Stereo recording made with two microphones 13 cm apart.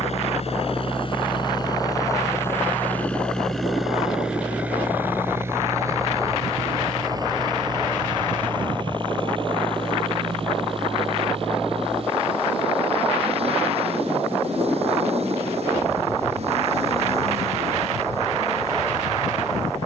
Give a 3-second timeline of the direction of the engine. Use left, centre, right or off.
left, centre, right, right, right, right, right.